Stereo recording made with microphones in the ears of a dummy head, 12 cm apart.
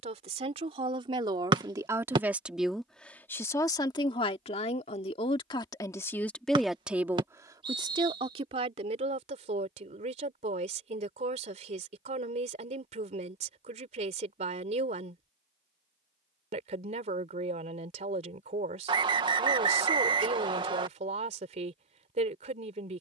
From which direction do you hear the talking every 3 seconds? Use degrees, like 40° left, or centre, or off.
30° right, 30° left, 20° right, 50° right, 50° right, 50° right, 50° right, 50° right.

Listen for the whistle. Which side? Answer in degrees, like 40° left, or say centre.
40° right.